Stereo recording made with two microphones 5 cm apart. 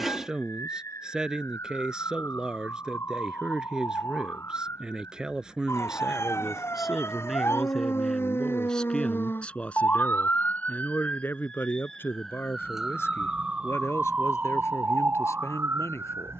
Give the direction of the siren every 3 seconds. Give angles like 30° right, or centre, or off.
70° left, 70° left, 60° left, 30° left, 20° right, 50° right.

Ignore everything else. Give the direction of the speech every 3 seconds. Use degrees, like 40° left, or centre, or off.
20° right, 20° right, centre, 30° left, 60° left, 70° left.